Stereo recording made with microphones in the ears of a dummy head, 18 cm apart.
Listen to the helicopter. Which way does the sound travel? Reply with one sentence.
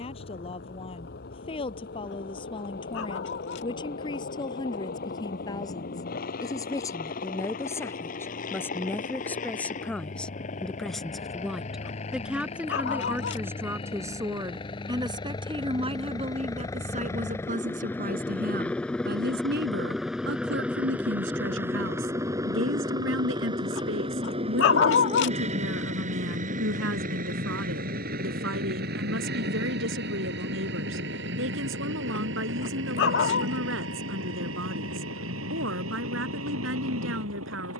You can hear the helicopter travel towards the right.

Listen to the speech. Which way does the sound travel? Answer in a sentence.
In this clip you hear the speech go from the left side to the right.